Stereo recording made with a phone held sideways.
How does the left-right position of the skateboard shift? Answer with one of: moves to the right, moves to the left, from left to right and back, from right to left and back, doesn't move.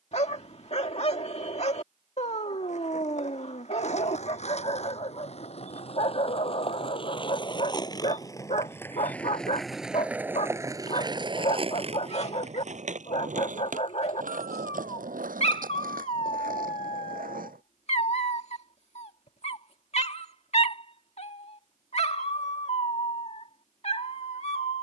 moves to the right.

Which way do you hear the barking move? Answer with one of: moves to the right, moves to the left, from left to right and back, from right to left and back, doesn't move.
doesn't move.